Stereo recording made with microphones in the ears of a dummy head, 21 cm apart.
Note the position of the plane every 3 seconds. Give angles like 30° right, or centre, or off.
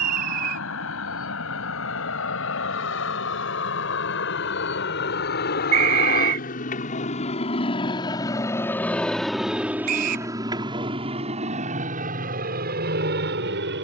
70° left, 60° left, 30° left, 20° right, 40° right.